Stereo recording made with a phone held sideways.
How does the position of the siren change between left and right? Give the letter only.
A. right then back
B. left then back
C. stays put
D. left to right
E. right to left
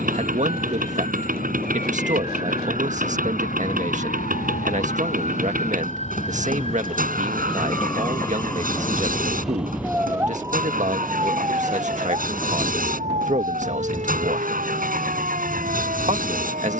D.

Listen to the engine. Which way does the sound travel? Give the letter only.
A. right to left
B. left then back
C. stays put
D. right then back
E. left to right
C.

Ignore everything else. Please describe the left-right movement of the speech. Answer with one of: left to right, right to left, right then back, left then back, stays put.
stays put.